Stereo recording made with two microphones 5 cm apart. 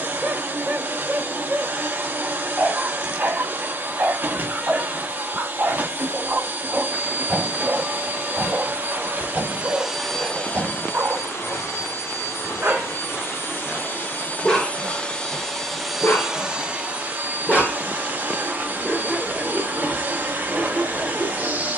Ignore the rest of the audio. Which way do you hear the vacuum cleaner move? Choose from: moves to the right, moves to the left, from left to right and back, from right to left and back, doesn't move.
from right to left and back.